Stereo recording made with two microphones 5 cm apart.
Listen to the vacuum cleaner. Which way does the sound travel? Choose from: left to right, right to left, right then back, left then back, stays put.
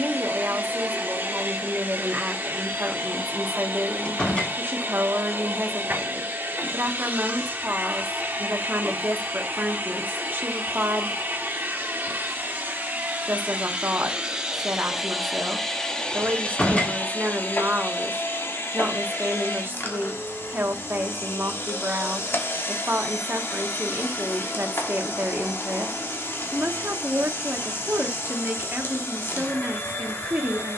right to left.